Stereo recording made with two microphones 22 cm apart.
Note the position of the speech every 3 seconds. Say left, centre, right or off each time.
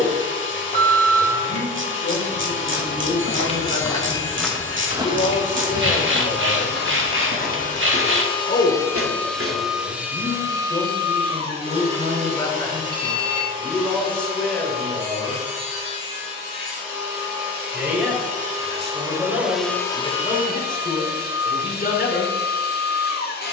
left, left, left, left, centre, centre, centre, left.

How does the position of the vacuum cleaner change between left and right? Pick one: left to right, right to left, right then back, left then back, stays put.
right then back.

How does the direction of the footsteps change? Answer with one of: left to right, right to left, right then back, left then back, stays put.
left to right.